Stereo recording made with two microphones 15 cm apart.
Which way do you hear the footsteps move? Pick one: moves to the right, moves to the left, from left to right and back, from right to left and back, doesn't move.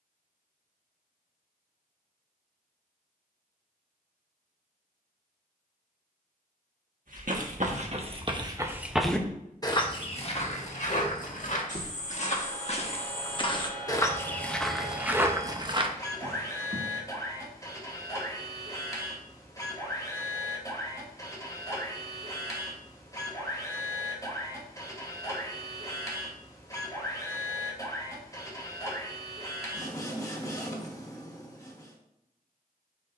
from right to left and back.